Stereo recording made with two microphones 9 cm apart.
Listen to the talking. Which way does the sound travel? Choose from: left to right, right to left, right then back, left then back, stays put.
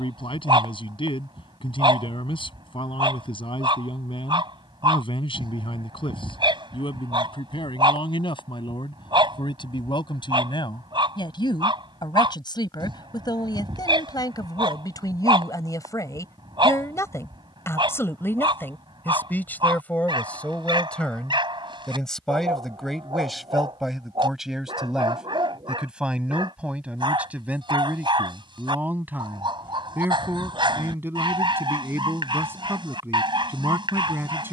left to right.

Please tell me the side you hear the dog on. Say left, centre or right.
right.